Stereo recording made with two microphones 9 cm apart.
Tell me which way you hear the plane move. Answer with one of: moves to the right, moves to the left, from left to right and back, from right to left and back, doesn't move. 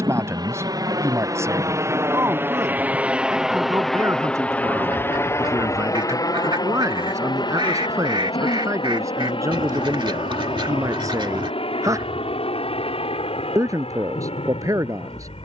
moves to the left.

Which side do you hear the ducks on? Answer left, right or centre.
right.